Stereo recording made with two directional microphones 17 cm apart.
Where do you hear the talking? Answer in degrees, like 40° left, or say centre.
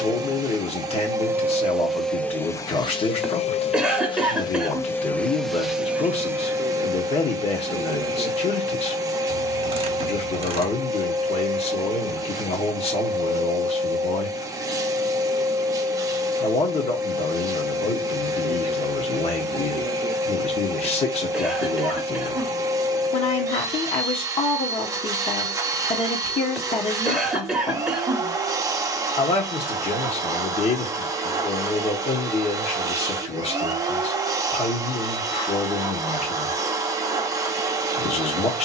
40° left.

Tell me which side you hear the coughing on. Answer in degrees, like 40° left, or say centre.
centre.